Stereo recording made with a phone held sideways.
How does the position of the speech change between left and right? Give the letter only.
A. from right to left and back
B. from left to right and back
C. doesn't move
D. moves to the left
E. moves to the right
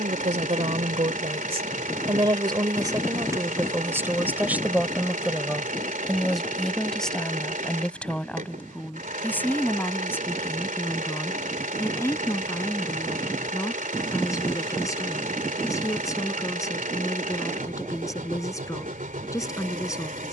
D.